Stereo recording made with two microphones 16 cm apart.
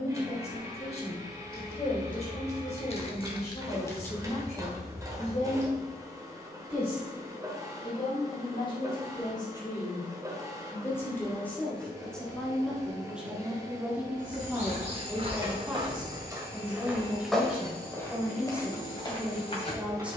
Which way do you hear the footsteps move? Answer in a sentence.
In this clip you hear the footsteps move from right to left.